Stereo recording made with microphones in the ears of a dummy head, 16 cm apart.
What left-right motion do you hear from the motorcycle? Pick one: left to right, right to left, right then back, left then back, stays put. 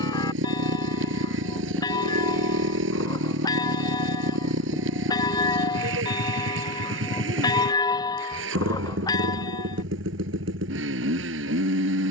stays put.